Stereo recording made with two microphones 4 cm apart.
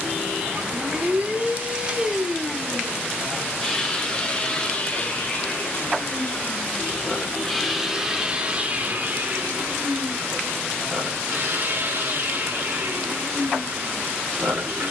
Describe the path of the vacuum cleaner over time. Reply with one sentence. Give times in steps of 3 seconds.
In this clip you hear the vacuum cleaner on the right from 0 s, on the left from 3 s, in the centre from 6 s and on the right from 9 s.